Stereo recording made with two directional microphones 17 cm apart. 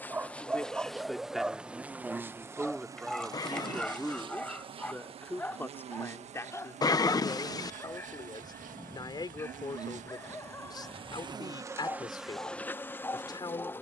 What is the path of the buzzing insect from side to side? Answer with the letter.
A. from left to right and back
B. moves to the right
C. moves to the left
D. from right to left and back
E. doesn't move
A.